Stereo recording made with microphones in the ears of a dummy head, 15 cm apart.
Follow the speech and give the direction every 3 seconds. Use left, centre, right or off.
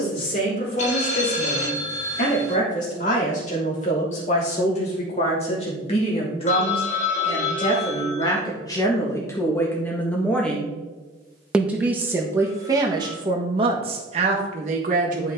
left, left, left, centre, right.